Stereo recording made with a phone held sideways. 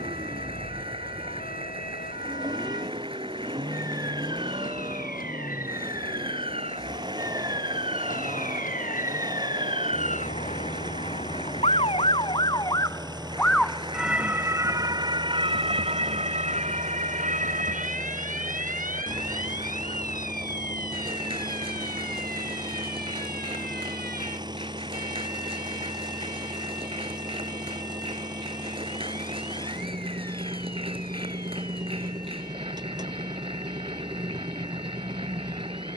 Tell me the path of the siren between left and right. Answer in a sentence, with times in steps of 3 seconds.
In this clip you hear the siren on the left from 0 s, in the centre from 12 s and on the right from 15 s.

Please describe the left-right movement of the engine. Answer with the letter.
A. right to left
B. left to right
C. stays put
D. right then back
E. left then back
C.